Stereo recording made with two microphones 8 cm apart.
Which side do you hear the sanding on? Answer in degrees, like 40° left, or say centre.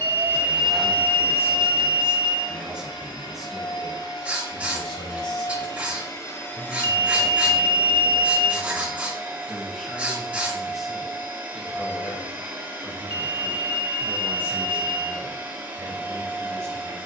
20° right.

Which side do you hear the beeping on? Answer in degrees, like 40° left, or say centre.
80° right.